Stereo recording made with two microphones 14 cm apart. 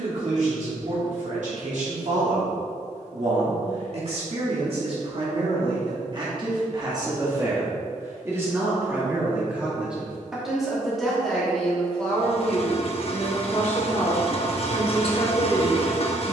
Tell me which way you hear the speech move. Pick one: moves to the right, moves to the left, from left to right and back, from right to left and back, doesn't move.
moves to the left.